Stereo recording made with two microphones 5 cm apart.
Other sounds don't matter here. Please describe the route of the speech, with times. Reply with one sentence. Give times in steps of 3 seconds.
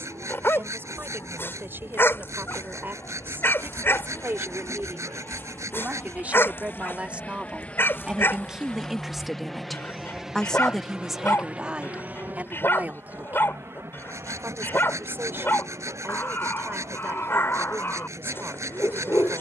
You can hear the speech on the right from 0 s, in the centre from 9 s and on the right from 12 s.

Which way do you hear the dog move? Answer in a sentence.
You can hear the dog stay in one place.